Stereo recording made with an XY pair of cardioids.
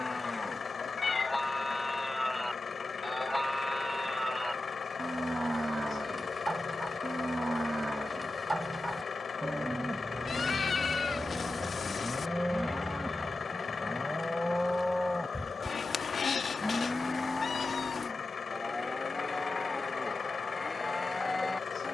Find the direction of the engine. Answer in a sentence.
In this clip you hear the engine on the left.